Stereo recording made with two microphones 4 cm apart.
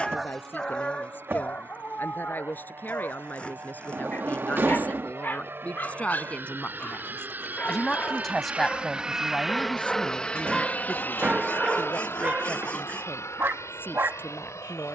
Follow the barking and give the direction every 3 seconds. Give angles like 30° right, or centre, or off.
30° left, 50° left, 40° left, centre, 50° right.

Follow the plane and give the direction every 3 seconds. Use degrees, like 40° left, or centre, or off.
70° right, 70° right, 50° right, 20° left, 70° left.